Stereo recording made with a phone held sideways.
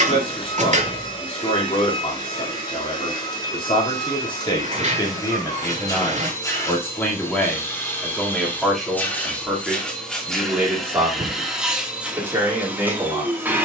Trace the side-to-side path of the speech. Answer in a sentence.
You can hear the speech move to the right.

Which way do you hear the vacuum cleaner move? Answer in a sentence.
In this clip you hear the vacuum cleaner go from the left side to the right.